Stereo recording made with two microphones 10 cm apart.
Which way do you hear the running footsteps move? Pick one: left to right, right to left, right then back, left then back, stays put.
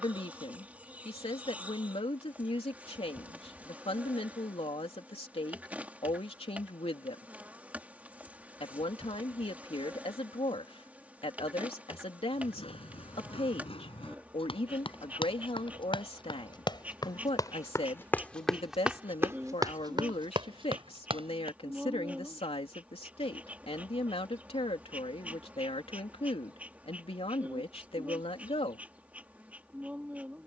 left to right.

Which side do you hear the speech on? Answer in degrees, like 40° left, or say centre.
70° left.